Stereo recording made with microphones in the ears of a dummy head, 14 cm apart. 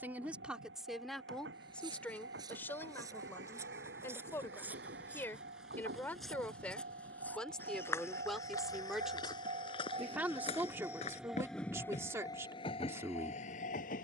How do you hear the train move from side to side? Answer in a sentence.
In this clip you hear the train move from right to left.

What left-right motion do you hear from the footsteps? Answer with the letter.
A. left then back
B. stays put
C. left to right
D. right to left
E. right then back
D.